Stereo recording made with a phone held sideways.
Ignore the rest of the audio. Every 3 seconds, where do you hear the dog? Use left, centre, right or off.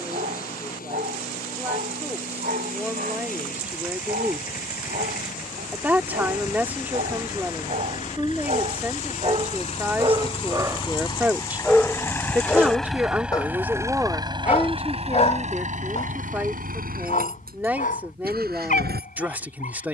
right, right, right, right, left, left, left.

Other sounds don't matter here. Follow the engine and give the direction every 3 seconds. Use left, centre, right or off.
left, left, left, left, centre, right, right.